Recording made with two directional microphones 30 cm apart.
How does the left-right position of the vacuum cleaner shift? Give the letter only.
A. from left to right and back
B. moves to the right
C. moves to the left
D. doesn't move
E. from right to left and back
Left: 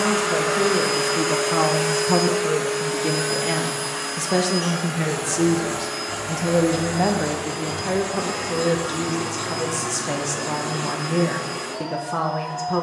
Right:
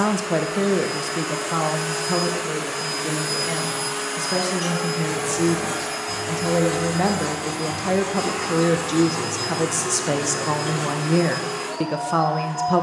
B.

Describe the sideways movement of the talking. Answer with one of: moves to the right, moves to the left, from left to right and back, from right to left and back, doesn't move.
from right to left and back.